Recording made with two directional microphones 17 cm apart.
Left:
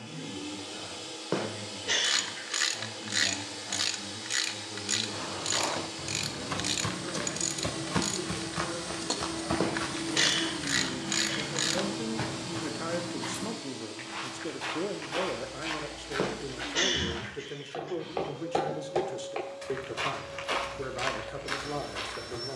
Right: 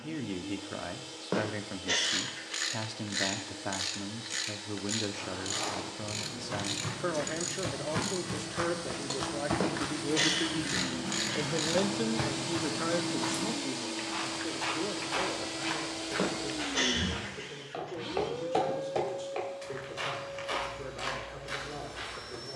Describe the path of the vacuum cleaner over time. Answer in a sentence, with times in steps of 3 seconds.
You can hear the vacuum cleaner on the left from 0 s, in the centre from 9 s, on the right from 12 s, in the centre from 18 s and on the left from 21 s.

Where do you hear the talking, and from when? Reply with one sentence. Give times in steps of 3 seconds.
In this clip you hear the talking on the right from 0 s, in the centre from 12 s and on the left from 15 s.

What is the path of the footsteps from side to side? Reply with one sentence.
You can hear the footsteps go right and come back.